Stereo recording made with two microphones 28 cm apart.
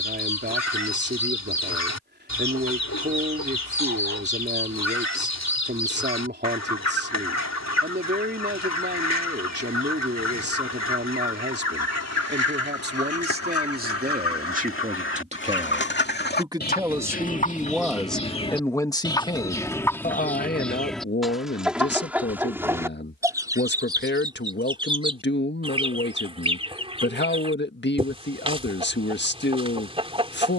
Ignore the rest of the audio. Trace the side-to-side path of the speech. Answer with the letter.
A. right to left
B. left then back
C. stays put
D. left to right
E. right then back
A.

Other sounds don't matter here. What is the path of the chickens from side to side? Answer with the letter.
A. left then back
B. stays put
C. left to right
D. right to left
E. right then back
C.